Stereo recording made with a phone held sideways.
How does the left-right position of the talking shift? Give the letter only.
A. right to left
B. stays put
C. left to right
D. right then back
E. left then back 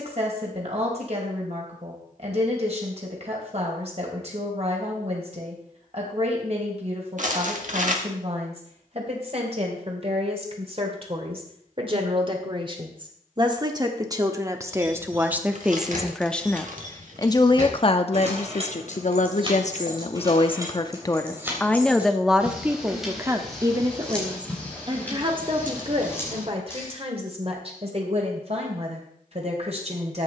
E.